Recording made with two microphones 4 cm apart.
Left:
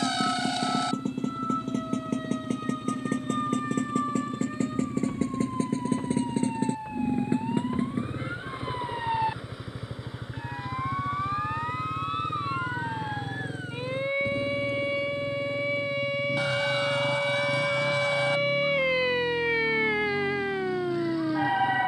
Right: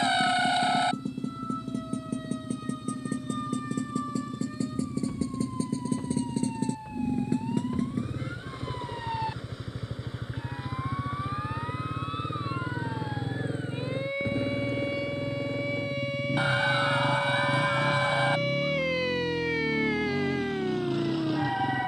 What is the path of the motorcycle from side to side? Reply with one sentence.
In this clip you hear the motorcycle move to the right.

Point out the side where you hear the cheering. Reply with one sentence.
You can hear the cheering on the right.